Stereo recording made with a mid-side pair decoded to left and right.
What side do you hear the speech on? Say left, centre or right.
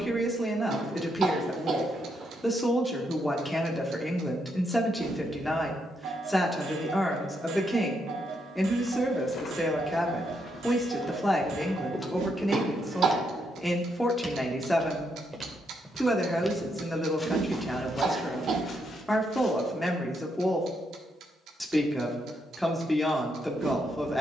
centre.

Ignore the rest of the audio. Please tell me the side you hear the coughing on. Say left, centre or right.
right.